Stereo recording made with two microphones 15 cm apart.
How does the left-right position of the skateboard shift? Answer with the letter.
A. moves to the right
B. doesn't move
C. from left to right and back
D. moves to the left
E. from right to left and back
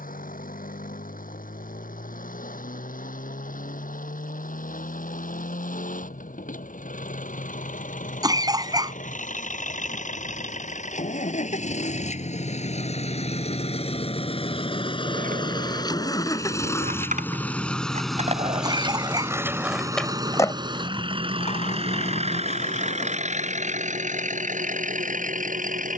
D.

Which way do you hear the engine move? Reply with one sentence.
You can hear the engine go from the left side to the right.